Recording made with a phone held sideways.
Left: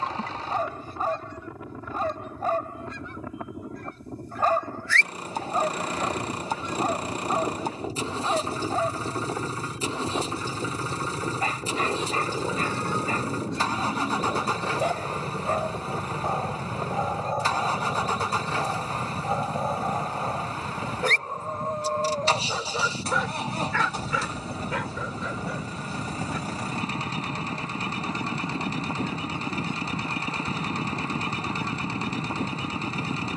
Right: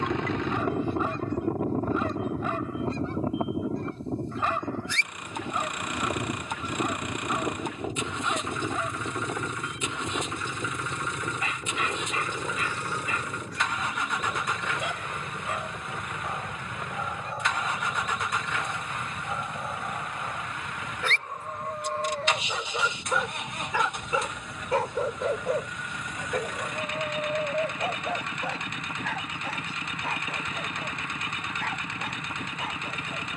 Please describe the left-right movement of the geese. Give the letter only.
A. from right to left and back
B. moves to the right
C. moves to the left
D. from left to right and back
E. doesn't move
C.